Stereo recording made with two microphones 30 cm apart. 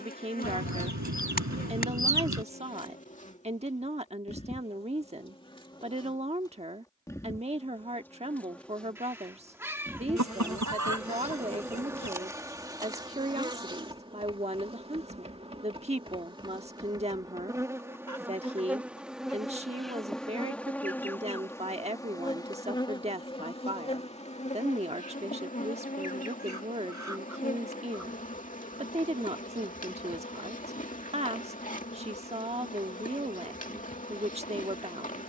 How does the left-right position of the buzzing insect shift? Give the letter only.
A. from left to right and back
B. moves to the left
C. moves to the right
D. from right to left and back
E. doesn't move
A.